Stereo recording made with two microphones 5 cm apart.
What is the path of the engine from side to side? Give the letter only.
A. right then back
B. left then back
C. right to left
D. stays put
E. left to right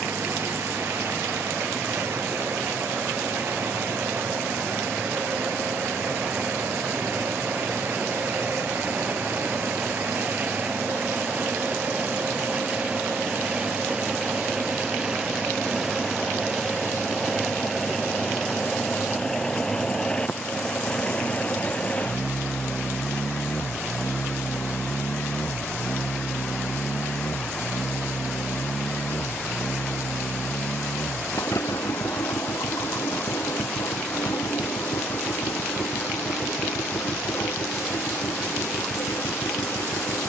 C.